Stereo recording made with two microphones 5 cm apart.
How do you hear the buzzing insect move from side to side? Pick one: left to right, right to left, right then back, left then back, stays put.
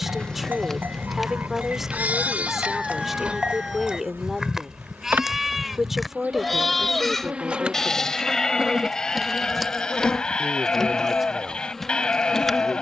right then back.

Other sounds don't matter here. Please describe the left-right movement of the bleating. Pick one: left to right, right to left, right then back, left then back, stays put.
right to left.